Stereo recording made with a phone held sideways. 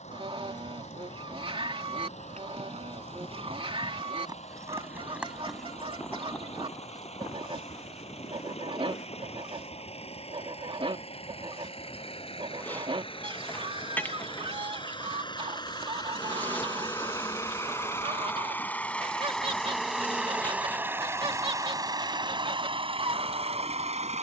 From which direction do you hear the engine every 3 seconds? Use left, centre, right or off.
left, left, left, left, left, left, centre, right.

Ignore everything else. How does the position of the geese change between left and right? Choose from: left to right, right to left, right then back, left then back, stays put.
stays put.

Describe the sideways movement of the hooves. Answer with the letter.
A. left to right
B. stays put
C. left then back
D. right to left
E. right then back
D.